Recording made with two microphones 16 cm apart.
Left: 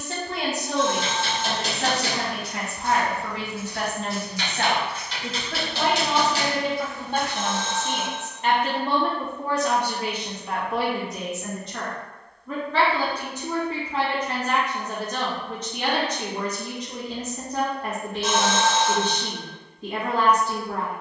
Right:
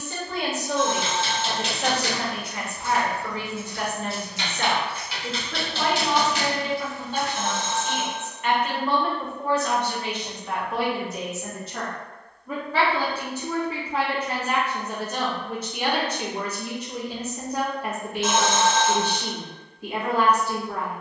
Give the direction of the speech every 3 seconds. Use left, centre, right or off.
left, left, left, centre, centre, centre, centre.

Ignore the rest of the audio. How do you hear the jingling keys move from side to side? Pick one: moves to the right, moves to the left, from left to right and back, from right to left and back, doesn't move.
from left to right and back.